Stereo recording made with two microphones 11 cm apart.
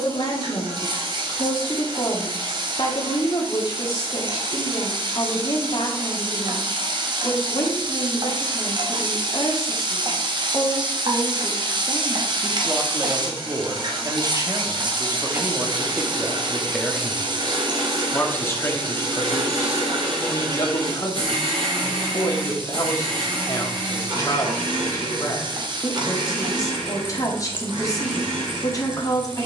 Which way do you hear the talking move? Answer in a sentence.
In this clip you hear the talking move from left to right and back again.